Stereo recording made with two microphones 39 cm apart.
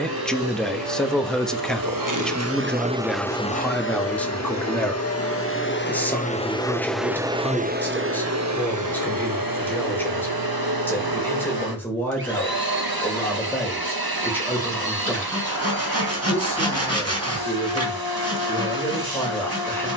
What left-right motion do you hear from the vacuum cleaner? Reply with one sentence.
In this clip you hear the vacuum cleaner move from right to left and back again.